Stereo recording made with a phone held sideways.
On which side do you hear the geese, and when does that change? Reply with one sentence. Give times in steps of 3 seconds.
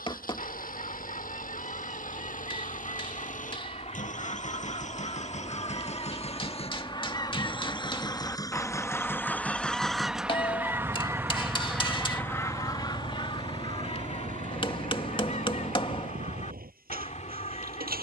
You can hear the geese on the left from 0 s, in the centre from 9 s and on the left from 12 s.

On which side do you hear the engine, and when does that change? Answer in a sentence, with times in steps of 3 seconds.
In this clip you hear the engine on the left from 0 s, in the centre from 9 s and on the right from 12 s.